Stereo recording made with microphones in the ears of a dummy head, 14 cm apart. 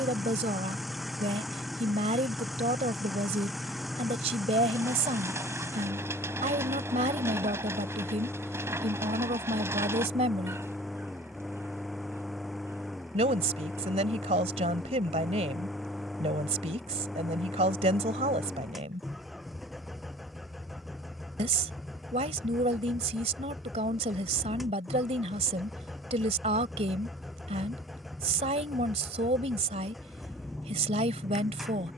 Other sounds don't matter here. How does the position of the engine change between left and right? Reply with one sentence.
In this clip you hear the engine stay in one place.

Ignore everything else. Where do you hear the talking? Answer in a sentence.
In this clip you hear the talking on the right.